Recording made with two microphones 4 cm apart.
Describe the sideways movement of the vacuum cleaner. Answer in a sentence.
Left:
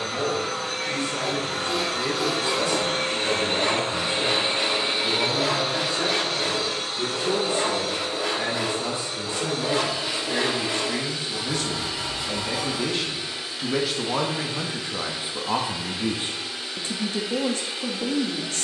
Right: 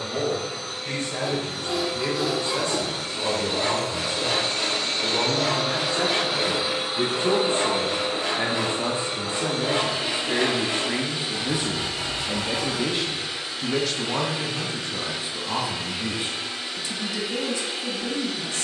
You can hear the vacuum cleaner go from the left side to the right.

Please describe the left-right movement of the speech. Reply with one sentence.
You can hear the speech travel towards the left.